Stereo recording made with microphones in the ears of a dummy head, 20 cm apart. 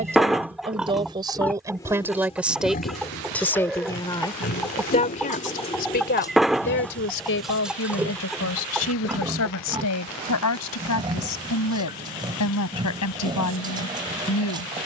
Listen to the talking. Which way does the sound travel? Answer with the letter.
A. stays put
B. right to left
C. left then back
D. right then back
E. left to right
B.